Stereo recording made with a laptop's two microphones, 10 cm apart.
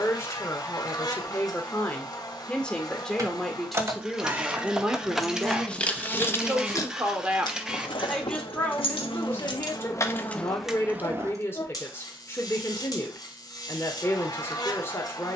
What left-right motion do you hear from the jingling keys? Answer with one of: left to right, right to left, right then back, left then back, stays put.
left then back.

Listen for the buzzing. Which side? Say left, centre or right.
left.